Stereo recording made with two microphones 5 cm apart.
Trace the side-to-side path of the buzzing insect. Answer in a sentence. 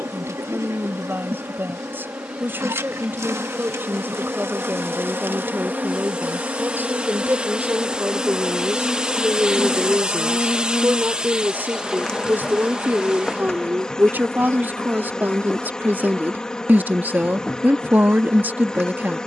In this clip you hear the buzzing insect go from the right side to the left.